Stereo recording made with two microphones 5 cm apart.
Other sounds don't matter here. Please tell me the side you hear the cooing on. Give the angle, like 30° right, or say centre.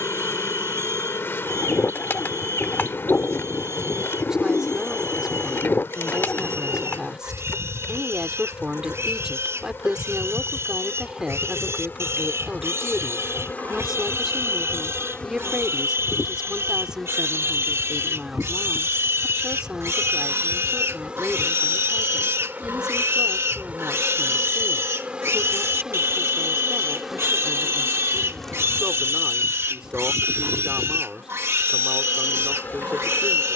50° left.